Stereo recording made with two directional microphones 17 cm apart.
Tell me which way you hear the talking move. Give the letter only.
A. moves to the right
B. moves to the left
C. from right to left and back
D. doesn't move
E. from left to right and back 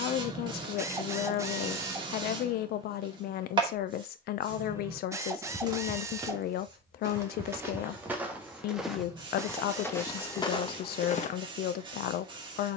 D.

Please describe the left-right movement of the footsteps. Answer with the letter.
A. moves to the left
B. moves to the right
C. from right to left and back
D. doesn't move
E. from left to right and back
A.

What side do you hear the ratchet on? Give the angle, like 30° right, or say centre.
20° right.